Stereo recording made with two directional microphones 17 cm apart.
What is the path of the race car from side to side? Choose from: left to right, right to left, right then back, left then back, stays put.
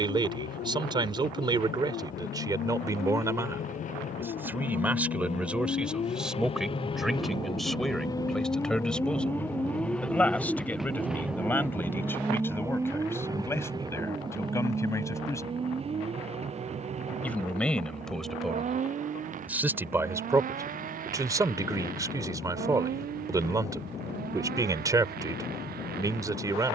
left to right.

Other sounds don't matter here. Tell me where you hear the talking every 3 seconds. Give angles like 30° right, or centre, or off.
20° right, 10° right, centre, 10° left, 20° left, 10° left, 10° right, 20° right, 20° right.